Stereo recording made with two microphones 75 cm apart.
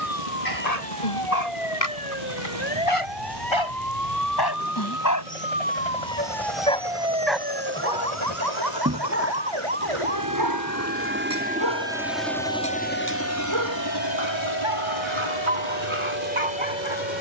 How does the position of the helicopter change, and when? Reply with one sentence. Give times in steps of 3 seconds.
You can hear the helicopter on the right from 0 s and on the left from 12 s.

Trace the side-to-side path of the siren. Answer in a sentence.
You can hear the siren go from the left side to the right.